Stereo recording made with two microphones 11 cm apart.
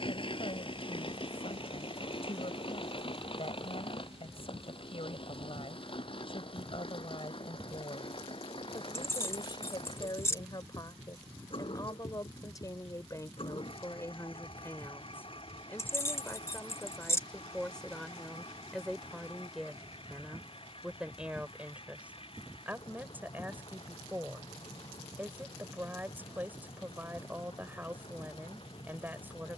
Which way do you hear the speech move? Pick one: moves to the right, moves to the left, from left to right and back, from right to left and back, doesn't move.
moves to the right.